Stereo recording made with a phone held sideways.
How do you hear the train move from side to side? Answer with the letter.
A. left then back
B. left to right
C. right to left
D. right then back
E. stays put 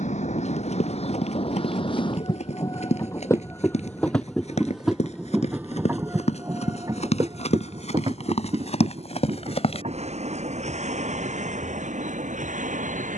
B.